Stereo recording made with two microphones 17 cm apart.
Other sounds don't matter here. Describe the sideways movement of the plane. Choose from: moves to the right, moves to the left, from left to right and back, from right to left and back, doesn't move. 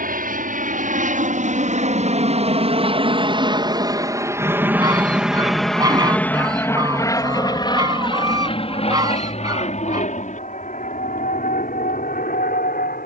moves to the left.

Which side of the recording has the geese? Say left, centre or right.
right.